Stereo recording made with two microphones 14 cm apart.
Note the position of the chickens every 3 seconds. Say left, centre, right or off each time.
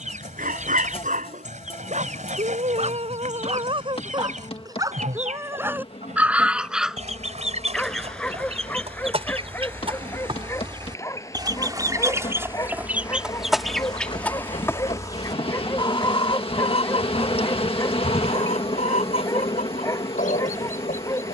right, right, right, right, centre, left, left.